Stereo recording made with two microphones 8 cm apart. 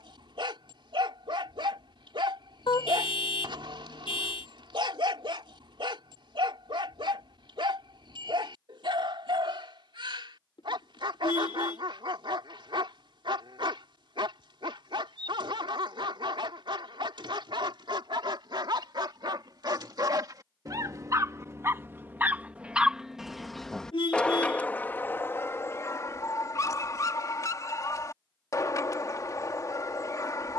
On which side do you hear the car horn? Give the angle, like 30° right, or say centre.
70° left.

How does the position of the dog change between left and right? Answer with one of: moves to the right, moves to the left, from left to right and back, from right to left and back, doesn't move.
moves to the left.